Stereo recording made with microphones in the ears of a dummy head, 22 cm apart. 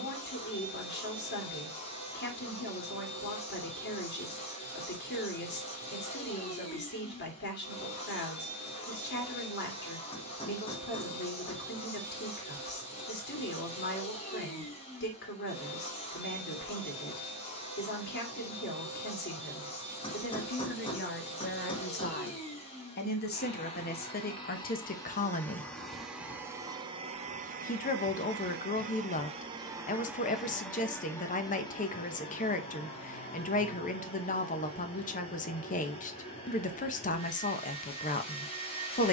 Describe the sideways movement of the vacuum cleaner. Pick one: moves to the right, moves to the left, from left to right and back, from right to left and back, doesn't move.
from left to right and back.